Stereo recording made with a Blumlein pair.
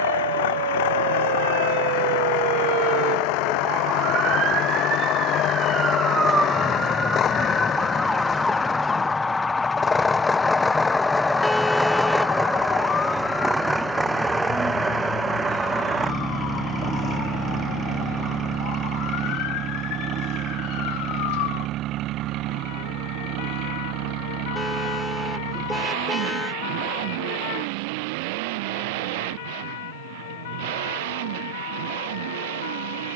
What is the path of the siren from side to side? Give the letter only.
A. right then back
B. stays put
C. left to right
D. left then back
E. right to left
E.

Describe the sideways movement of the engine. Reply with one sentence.
You can hear the engine move from left to right.